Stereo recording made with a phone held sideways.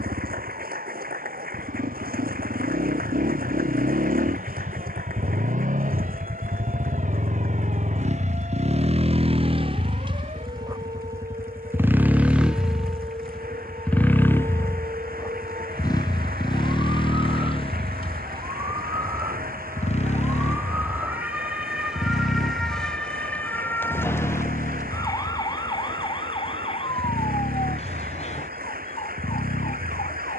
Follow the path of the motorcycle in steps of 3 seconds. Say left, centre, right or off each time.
right, right, right, right, centre, left, left, left, left, left.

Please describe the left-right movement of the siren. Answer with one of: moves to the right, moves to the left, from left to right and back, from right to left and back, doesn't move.
moves to the left.